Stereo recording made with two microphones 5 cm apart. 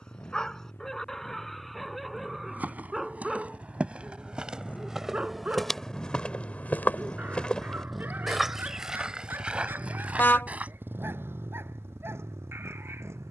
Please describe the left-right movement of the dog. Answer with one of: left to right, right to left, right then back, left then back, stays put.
left to right.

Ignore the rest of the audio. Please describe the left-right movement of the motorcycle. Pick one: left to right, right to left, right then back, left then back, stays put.
left to right.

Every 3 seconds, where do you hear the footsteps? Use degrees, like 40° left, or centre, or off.
40° right, 20° right, 20° left, 30° right, off.